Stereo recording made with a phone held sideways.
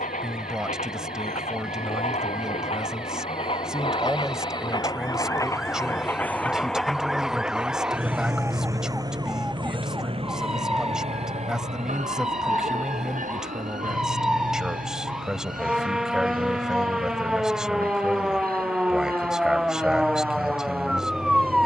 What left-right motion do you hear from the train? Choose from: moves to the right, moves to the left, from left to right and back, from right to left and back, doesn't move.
moves to the right.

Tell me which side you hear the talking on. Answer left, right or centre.
centre.